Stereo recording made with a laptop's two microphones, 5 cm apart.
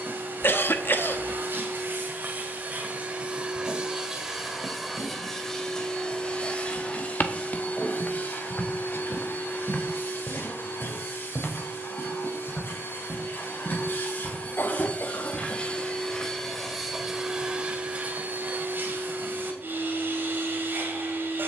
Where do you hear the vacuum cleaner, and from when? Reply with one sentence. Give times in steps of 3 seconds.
In this clip you hear the vacuum cleaner on the right from 0 s, in the centre from 3 s, on the left from 6 s, in the centre from 15 s and on the right from 18 s.